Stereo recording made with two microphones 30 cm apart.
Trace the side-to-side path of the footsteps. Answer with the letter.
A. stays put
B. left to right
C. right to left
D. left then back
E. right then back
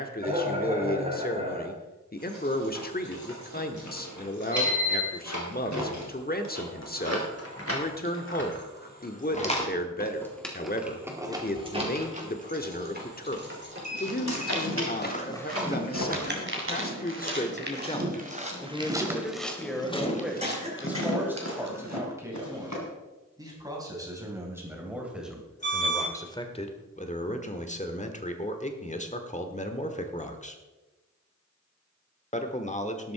E.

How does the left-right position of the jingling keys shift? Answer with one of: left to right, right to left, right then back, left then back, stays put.
left to right.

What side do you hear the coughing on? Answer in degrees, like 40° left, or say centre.
20° right.